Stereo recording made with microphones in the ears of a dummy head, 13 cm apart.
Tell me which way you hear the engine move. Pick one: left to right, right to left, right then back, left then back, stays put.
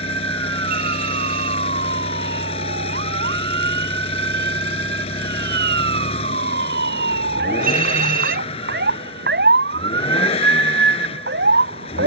stays put.